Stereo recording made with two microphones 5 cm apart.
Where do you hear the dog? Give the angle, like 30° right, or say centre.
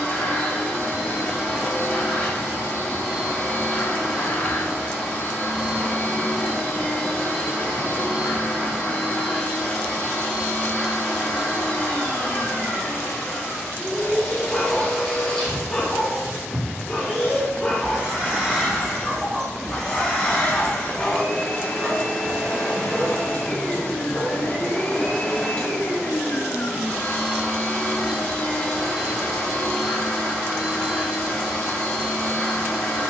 10° left.